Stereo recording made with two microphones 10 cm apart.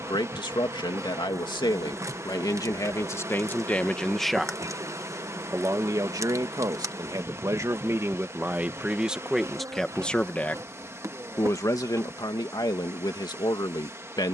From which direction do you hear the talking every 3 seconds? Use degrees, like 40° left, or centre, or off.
40° left, centre, 30° right, 10° left, 40° left.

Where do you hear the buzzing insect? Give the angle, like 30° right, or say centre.
30° right.